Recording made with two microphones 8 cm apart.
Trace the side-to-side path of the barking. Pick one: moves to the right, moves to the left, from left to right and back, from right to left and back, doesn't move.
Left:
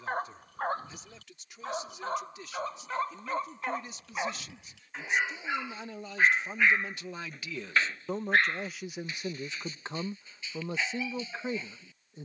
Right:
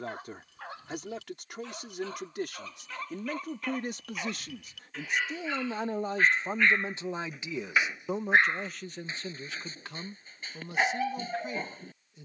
moves to the right.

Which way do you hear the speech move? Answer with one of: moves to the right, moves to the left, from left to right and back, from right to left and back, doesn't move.
moves to the left.